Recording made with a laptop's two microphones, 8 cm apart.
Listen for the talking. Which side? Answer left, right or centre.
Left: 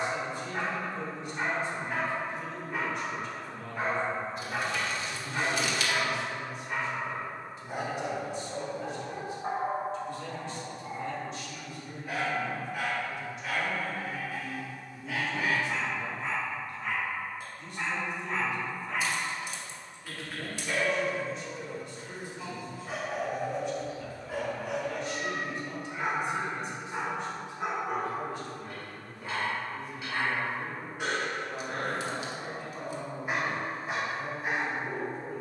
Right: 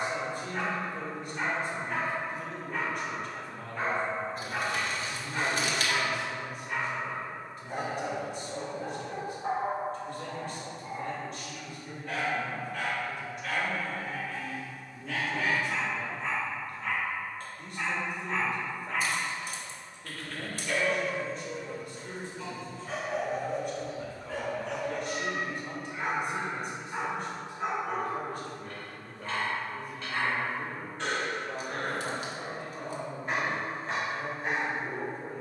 right.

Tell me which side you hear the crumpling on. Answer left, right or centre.
right.